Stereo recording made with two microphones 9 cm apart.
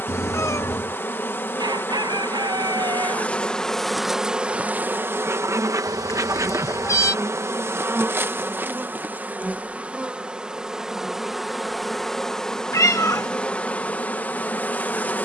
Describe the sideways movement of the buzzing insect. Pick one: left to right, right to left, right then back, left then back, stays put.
right then back.